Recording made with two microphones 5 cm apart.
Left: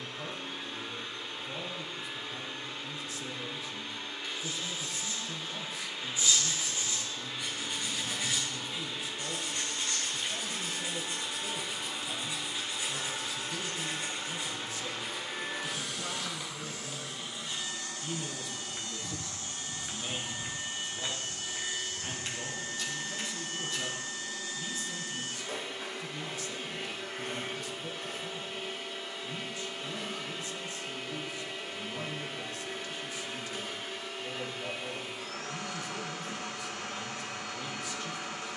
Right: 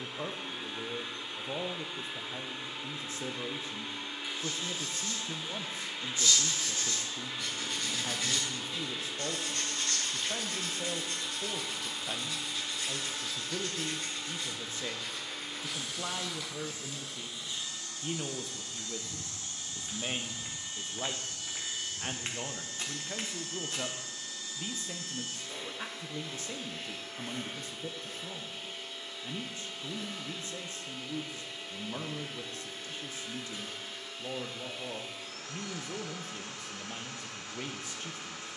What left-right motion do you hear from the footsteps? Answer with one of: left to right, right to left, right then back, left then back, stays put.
left to right.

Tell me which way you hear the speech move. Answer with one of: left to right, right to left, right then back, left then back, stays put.
stays put.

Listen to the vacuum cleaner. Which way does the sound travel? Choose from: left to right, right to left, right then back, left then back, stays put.
right to left.